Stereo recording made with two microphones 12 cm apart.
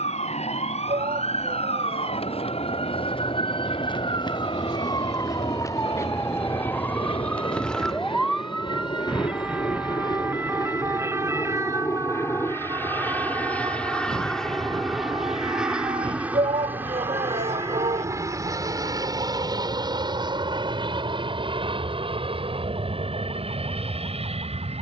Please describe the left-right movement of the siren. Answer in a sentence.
In this clip you hear the siren travel towards the right.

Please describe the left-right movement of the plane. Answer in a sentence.
In this clip you hear the plane travel towards the right.